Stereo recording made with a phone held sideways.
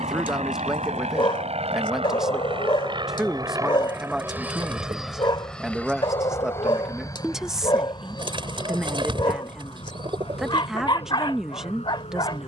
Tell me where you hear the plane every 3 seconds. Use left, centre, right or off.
right, centre, left, left.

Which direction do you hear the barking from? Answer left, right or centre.
left.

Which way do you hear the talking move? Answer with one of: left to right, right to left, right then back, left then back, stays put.
stays put.